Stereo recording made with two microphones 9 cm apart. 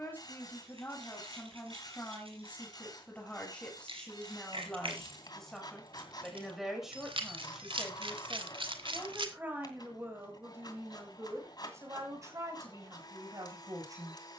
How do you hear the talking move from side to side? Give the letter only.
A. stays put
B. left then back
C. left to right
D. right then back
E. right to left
C.